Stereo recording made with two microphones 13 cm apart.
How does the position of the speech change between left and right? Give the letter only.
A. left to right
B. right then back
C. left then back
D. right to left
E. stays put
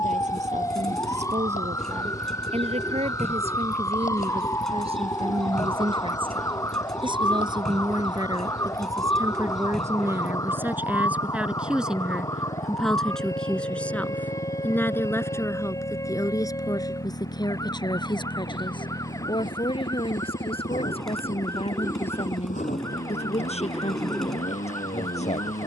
D.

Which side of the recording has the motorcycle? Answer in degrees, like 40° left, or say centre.
70° left.